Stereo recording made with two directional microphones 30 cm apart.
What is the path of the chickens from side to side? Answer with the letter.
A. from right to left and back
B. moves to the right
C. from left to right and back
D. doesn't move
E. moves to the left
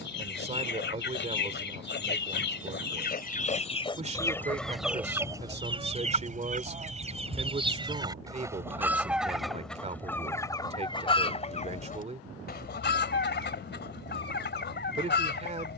C.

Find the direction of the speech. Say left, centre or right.
right.